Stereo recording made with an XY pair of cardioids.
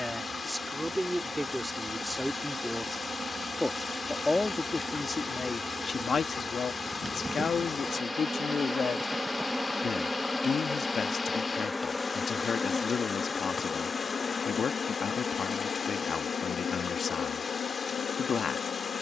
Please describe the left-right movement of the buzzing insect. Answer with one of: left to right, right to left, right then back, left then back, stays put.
right to left.